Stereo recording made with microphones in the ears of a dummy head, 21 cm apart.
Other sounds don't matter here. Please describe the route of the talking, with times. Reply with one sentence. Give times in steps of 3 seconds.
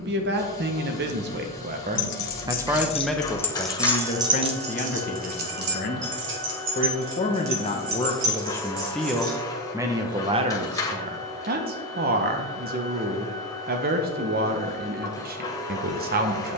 You can hear the talking on the right from 0 s, on the left from 3 s and on the right from 9 s.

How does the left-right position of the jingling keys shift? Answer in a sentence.
You can hear the jingling keys go from the left side to the right.